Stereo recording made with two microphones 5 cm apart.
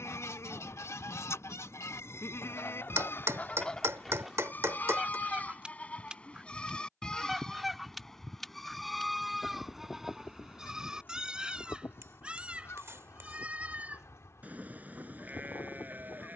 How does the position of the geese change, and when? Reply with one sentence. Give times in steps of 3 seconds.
You can hear the geese on the left from 0 s, in the centre from 3 s and on the left from 9 s.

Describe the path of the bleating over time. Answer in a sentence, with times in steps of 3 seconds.
In this clip you hear the bleating on the left from 0 s, in the centre from 6 s and on the right from 12 s.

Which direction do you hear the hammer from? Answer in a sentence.
You can hear the hammer on the right.